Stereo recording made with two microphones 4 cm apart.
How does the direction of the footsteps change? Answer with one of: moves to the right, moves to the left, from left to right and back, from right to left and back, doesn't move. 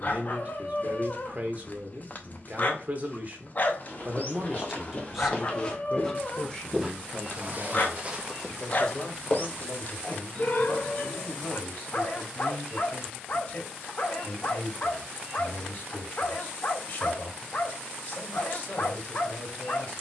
from left to right and back.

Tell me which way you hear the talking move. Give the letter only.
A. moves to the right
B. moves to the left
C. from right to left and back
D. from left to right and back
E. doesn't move
B.